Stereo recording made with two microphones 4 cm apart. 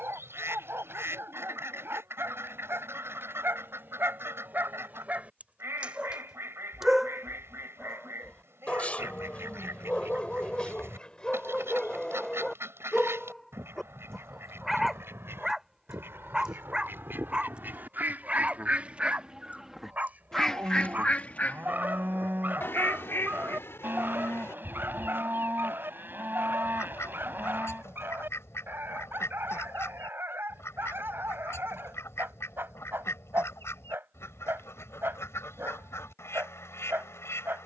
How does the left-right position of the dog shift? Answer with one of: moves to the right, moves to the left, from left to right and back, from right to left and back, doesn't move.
from right to left and back.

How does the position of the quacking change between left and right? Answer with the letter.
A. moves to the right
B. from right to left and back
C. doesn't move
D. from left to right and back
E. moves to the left
E.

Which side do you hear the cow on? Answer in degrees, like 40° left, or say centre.
50° right.